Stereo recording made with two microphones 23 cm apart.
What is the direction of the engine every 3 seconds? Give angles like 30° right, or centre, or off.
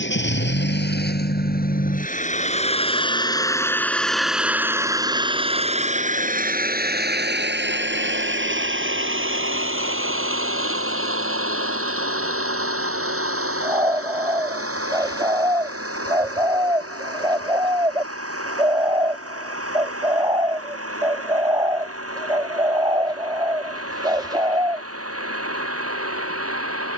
40° left, 10° right, 50° right, 70° right, 70° right, 80° right, 80° right, 80° right, 80° right.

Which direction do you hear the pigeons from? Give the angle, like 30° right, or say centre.
20° right.